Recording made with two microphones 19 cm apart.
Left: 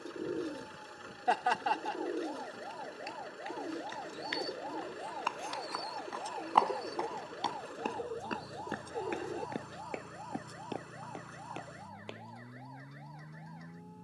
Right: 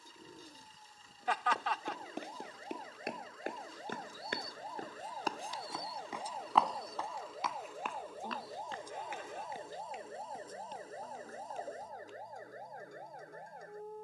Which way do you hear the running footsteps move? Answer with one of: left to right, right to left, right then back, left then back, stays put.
right to left.